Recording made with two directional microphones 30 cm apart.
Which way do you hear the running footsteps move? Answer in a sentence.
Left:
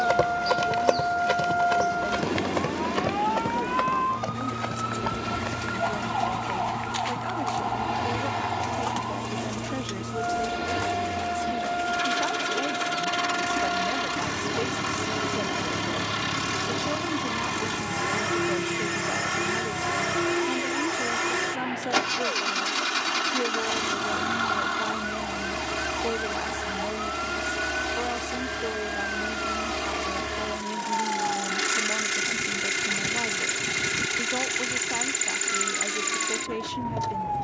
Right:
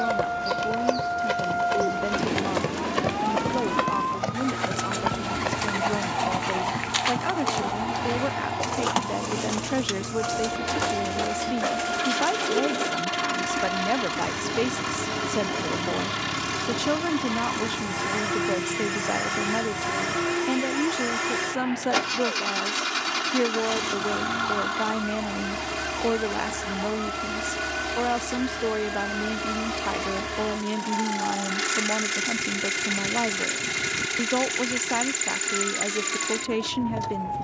In this clip you hear the running footsteps travel towards the right.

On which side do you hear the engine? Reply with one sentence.
You can hear the engine in the centre.